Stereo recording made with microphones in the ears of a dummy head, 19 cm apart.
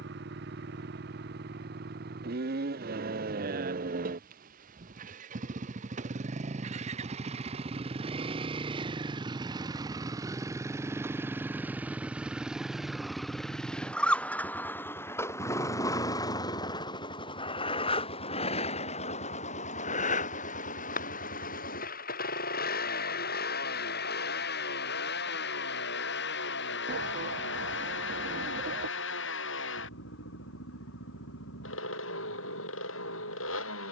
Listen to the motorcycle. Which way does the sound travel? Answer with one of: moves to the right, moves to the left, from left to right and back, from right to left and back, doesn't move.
moves to the left.